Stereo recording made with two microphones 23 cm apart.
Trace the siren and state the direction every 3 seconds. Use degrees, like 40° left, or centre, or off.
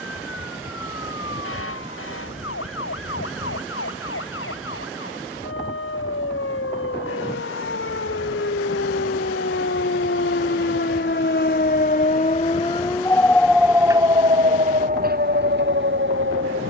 80° left, 80° left, 70° left, 60° left, centre, 50° right.